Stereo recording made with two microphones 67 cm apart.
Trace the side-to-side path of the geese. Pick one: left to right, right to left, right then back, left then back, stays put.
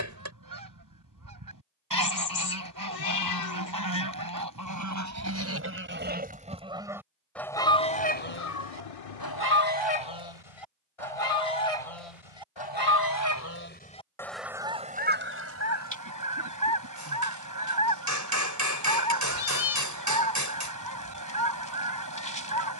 left then back.